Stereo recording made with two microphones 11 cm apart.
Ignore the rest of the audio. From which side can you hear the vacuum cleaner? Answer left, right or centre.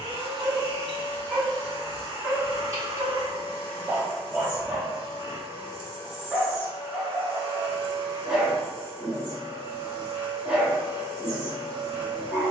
right.